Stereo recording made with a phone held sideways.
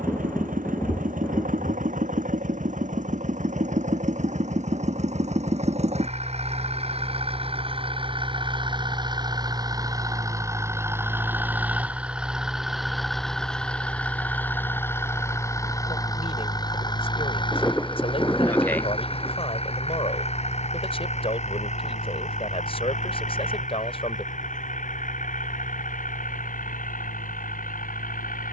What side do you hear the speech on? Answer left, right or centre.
left.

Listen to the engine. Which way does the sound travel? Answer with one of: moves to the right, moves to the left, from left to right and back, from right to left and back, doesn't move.
moves to the left.